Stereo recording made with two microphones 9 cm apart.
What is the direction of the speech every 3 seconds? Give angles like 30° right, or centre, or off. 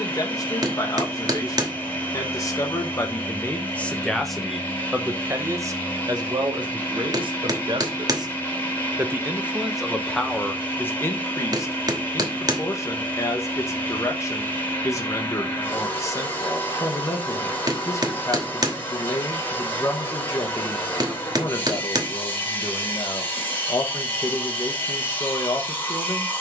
40° left, centre, 50° right, 10° left, 30° left, 30° left, 30° left, 30° left, 30° left.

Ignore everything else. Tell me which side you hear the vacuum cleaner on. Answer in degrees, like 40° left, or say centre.
20° left.